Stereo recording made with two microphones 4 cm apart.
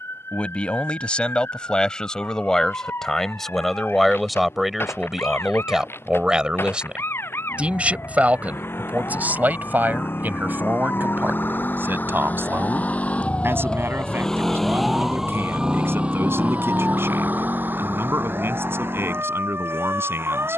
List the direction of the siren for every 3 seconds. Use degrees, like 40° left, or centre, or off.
80° left, 80° left, 70° left, 60° left, 30° left, 30° right, 60° right.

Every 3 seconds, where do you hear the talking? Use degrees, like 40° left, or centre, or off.
20° left, centre, 30° right, 50° right, 60° right, 70° right, 70° right.